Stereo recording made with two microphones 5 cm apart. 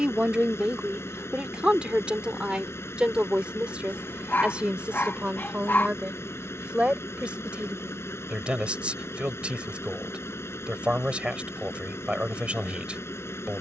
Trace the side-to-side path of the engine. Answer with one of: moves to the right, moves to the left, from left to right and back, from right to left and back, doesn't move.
doesn't move.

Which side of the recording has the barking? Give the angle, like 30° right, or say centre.
50° left.